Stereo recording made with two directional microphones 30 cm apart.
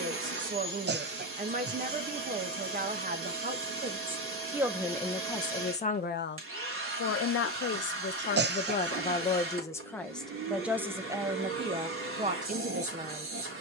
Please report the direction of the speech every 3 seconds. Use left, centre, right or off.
right, centre, left, centre, right.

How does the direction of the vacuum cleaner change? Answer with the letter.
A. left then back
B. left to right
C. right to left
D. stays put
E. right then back
D.